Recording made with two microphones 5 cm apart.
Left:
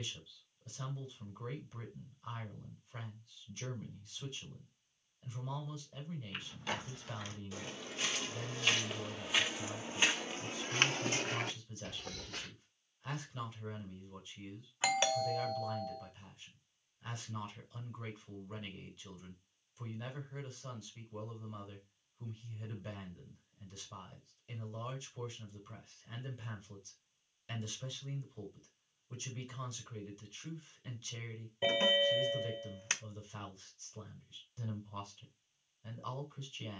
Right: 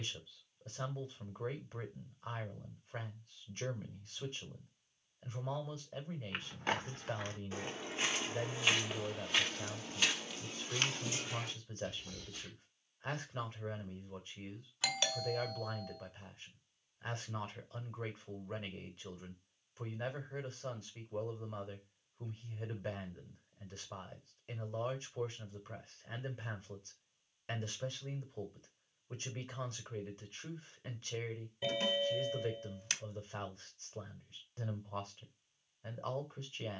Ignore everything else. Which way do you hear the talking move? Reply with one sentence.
You can hear the talking stay put.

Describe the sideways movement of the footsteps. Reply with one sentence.
In this clip you hear the footsteps go from the right side to the left.